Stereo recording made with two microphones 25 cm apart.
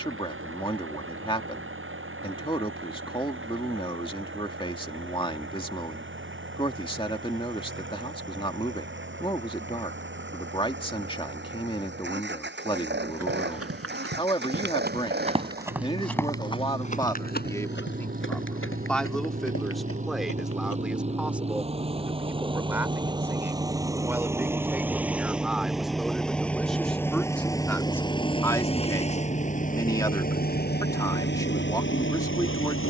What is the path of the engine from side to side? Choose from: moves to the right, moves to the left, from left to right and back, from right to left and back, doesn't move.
moves to the left.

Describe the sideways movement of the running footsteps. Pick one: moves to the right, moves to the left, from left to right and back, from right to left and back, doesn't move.
moves to the left.